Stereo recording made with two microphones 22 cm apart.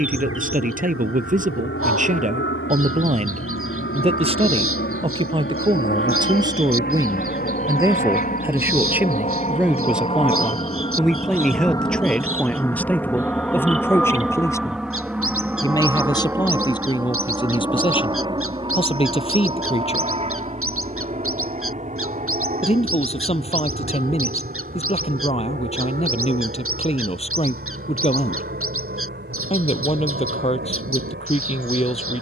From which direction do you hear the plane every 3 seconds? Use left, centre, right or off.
left, left, left, left, centre, centre, right, right, right, right, right.